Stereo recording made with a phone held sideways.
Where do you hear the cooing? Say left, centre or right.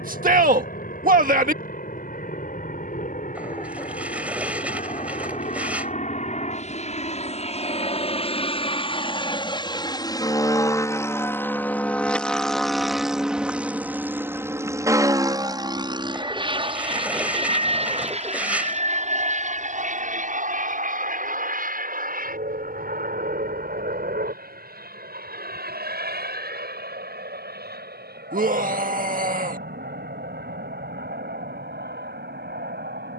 centre.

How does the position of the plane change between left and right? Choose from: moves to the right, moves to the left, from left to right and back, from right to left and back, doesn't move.
moves to the right.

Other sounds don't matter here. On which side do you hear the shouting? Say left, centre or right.
right.